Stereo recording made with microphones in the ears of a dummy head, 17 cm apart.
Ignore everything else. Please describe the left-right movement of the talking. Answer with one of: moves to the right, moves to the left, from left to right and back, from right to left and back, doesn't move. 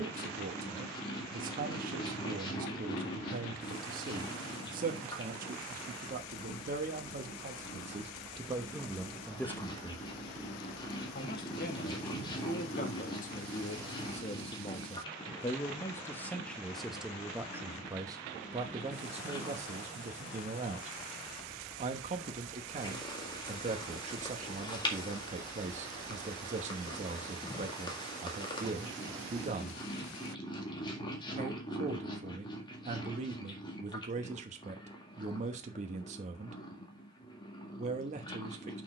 from right to left and back.